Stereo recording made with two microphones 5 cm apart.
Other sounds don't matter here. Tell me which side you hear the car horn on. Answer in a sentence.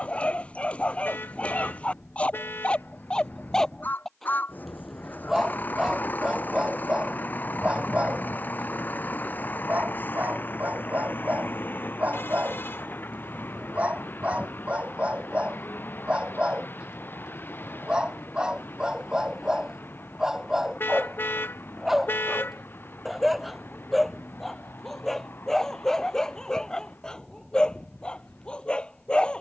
You can hear the car horn on the left.